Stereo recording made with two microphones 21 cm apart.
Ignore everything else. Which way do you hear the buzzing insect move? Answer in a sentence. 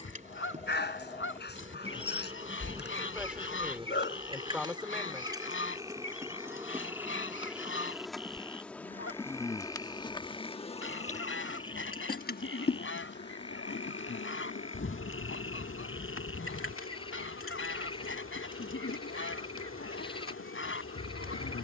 In this clip you hear the buzzing insect move from right to left.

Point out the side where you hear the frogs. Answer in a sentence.
You can hear the frogs on the left.